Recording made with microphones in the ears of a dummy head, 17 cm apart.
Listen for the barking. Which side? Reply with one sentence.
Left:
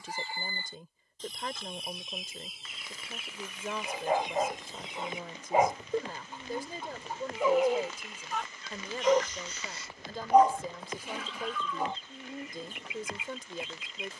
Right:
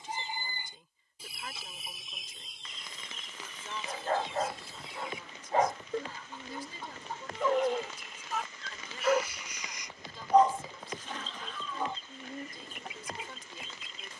You can hear the barking in the centre.